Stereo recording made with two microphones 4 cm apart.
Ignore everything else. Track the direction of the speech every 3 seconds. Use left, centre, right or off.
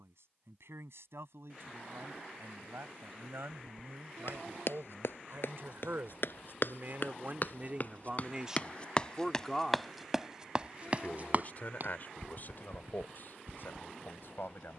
right, right, right, left, left.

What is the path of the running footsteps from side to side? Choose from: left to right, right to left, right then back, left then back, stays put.
left to right.